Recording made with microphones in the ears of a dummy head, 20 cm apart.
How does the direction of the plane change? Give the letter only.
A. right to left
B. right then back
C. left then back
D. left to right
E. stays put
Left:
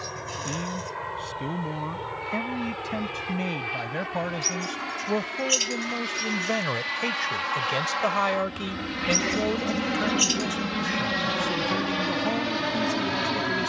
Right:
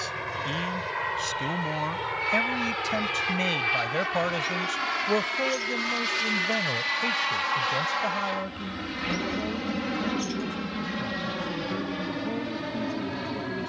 A.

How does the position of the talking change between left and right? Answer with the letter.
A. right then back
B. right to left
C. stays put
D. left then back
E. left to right
B.